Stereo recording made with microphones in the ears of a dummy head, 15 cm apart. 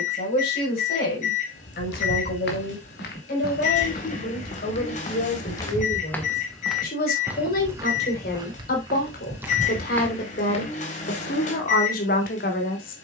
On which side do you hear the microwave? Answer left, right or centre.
left.